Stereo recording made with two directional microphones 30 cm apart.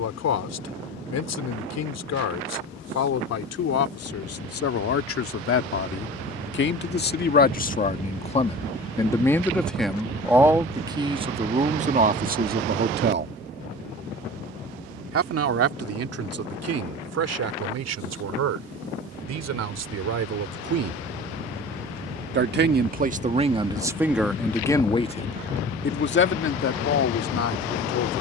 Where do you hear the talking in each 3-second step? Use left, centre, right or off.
left, left, left, centre, right, right, right, right, left, left.